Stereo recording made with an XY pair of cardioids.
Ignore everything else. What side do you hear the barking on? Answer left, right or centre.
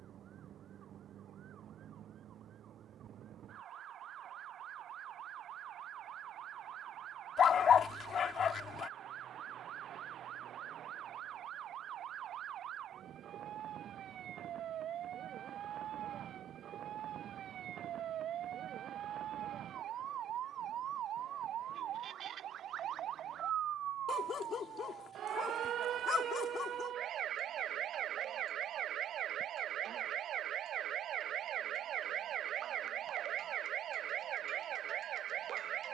left.